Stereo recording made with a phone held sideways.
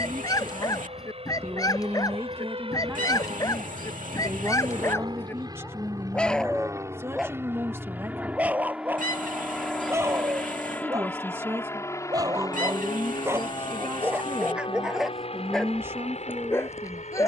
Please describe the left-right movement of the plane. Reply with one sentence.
In this clip you hear the plane move to the left.